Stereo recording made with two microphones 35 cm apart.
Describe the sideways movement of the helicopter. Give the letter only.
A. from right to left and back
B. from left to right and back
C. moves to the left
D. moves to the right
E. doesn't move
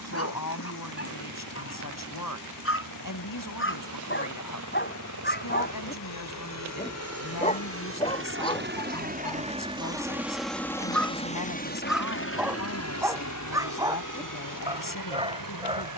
C.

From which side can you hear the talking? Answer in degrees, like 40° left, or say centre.
60° left.